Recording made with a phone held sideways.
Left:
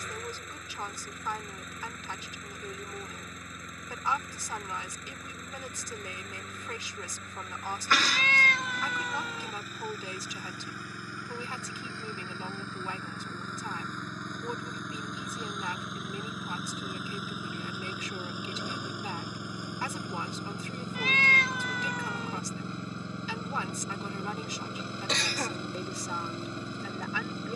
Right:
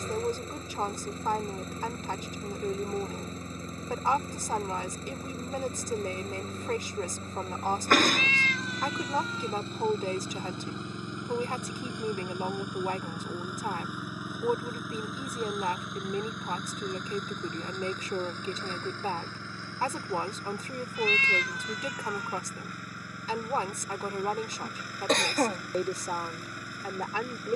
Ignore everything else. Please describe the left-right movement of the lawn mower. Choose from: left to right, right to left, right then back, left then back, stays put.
right to left.